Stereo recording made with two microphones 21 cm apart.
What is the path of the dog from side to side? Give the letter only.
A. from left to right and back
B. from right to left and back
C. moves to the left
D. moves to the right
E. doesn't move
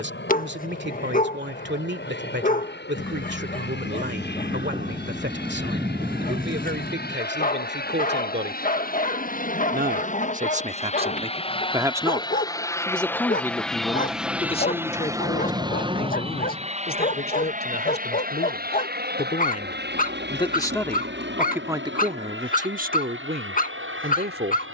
E.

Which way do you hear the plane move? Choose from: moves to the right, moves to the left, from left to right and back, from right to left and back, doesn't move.
moves to the right.